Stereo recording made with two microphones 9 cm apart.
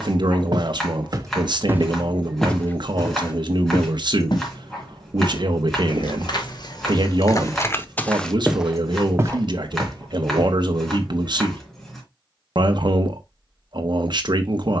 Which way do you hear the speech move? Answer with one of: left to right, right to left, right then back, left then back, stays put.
stays put.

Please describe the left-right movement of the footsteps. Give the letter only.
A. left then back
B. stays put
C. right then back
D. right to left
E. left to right
A.